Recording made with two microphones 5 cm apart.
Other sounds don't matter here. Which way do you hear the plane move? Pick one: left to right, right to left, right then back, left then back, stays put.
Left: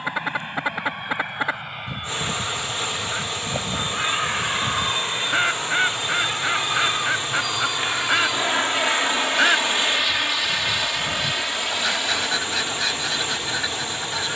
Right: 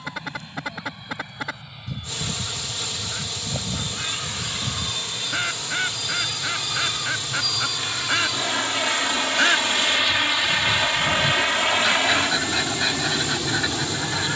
left to right.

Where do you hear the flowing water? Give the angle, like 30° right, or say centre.
40° left.